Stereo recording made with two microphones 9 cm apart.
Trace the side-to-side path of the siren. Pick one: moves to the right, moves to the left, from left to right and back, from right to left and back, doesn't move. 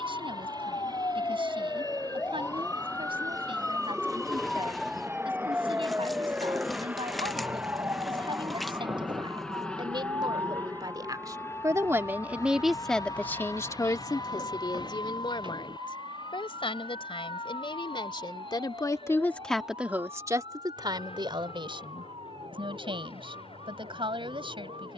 moves to the right.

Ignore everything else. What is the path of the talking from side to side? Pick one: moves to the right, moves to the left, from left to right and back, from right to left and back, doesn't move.
from right to left and back.